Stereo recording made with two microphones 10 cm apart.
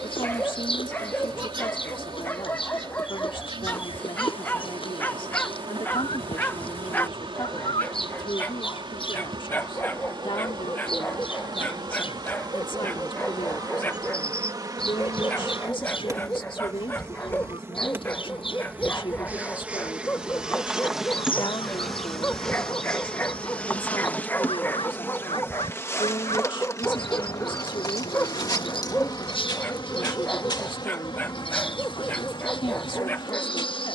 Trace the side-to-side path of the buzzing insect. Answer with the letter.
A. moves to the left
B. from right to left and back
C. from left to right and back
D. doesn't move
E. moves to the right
A.